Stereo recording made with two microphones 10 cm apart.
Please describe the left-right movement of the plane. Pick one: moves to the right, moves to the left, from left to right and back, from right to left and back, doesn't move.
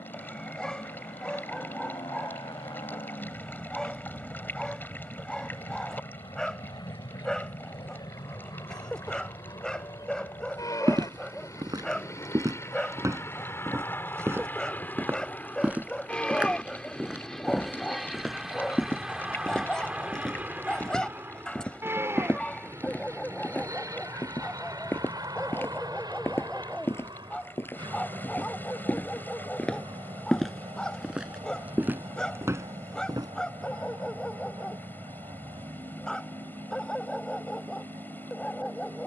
moves to the right.